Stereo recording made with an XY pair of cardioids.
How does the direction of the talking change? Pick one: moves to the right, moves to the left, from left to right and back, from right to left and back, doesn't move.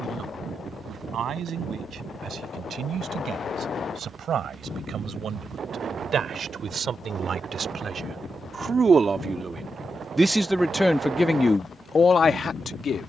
moves to the left.